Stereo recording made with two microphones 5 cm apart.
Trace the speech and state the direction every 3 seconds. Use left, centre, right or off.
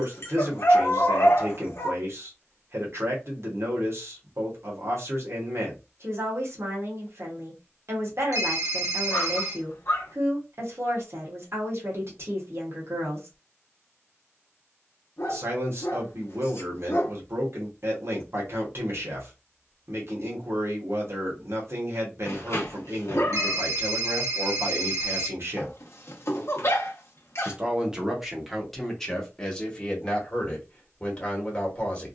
right, right, right, right, right, right, right, right, right, centre, left.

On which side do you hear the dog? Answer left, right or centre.
left.